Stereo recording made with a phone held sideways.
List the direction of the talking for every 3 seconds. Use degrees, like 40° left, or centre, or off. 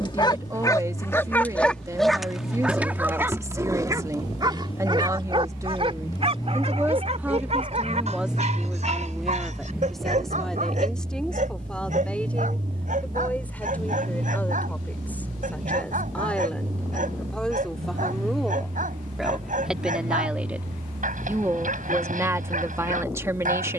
20° right, 20° right, 10° right, centre, 10° left, 10° left, centre, 20° right.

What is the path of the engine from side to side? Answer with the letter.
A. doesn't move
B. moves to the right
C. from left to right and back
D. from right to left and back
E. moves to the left
B.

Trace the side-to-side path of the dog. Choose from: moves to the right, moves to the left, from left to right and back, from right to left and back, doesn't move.
moves to the right.